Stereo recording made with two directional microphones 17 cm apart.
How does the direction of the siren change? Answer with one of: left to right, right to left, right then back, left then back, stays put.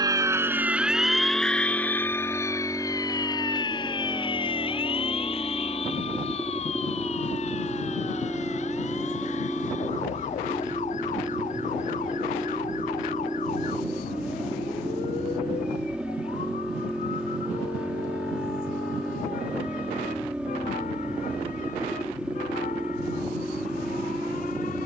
right to left.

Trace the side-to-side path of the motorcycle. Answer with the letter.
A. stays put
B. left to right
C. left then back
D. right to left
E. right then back
A.